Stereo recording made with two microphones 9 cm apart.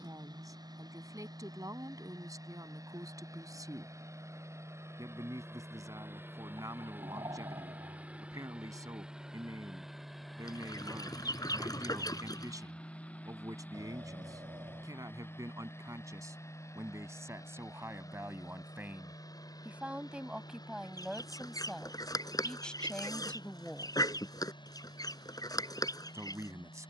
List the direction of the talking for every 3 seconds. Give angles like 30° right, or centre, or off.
40° right, 40° right, 40° right, 40° right, 40° right, 40° right, 20° right, 10° left, 30° right.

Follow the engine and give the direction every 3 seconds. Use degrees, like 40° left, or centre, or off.
40° right, 30° right, 20° right, centre, 20° left, 30° left, 40° left, 50° left, 50° left.